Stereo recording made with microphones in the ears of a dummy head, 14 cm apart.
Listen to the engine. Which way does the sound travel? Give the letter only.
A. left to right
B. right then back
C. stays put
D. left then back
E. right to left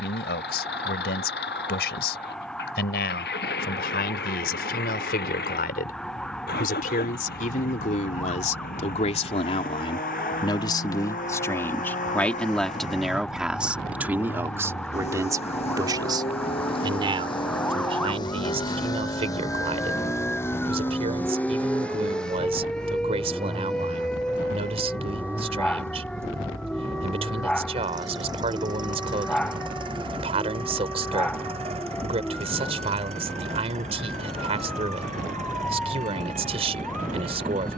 A.